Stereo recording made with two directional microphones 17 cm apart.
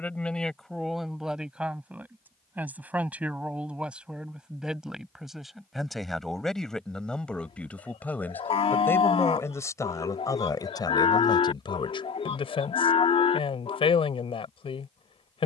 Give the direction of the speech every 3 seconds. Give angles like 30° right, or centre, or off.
centre, centre, 10° left, 20° left, 30° left.